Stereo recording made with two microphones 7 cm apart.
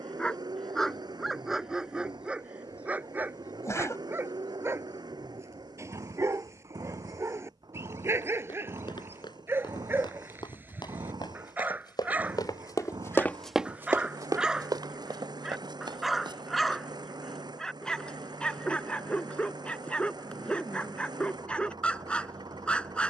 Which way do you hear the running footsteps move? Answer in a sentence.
You can hear the running footsteps travel towards the right.